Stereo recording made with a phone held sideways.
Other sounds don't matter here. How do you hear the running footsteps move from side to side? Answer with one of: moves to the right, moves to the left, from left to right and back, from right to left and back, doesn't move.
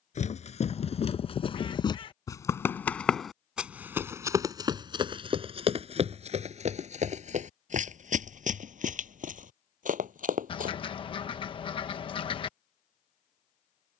moves to the right.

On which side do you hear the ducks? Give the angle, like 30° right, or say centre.
40° left.